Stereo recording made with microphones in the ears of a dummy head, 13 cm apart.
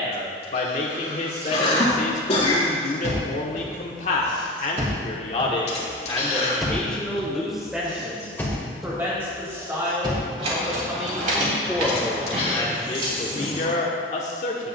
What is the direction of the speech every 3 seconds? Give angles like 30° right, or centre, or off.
50° left, 50° left, centre, 10° right, 40° left.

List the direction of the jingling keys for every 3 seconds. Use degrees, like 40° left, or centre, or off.
70° right, 50° right, 10° left, 40° right, 60° right.